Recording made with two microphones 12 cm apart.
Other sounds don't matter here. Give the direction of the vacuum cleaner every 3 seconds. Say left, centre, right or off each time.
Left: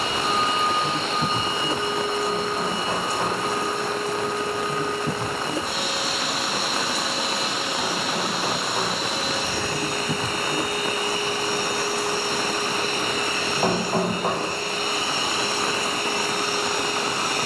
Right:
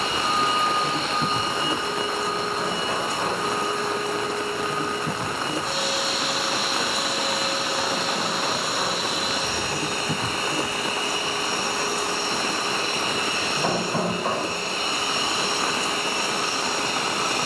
left, left, left, right, right, right.